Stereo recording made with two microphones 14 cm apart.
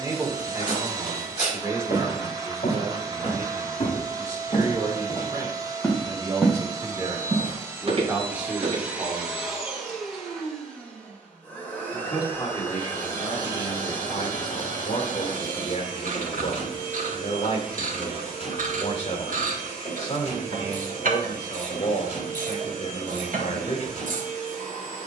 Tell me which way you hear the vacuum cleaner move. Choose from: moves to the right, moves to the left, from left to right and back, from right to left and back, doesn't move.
moves to the left.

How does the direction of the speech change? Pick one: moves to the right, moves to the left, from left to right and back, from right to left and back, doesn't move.
moves to the left.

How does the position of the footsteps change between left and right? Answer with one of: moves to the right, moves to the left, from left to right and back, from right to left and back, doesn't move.
moves to the right.